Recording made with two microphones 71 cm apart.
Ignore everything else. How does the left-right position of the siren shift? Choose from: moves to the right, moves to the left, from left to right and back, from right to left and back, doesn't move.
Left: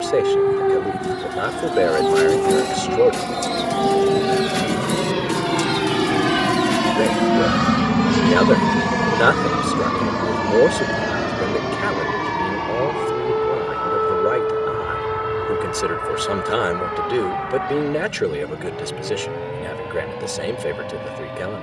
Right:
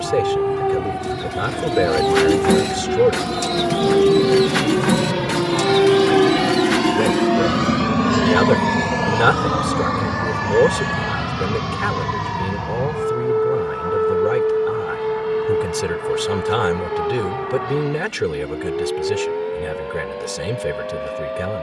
moves to the right.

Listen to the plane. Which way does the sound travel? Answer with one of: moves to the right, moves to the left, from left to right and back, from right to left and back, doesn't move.
moves to the left.